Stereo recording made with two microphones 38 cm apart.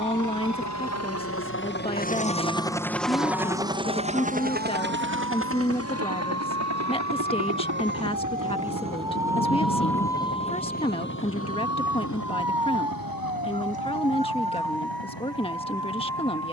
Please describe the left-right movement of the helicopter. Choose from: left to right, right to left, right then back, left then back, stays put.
left to right.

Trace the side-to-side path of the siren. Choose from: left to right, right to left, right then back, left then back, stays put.
right to left.